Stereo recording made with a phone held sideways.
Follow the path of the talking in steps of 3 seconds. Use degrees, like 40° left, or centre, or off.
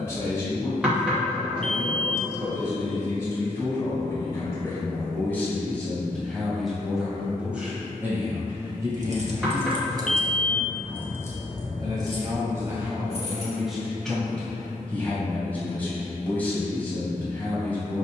20° left, 20° left, 10° right, 30° right, 10° right, 10° left.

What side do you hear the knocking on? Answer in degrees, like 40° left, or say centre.
10° right.